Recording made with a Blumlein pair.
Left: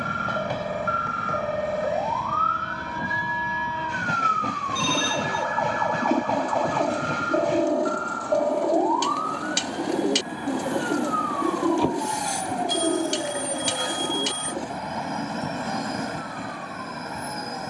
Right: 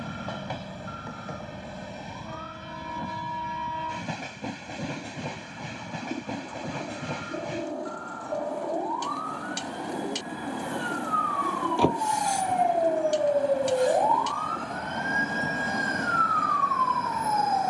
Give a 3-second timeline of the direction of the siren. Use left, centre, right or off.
left, left, left, centre, right, right.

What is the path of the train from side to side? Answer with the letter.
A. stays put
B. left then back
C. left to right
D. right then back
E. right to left
A.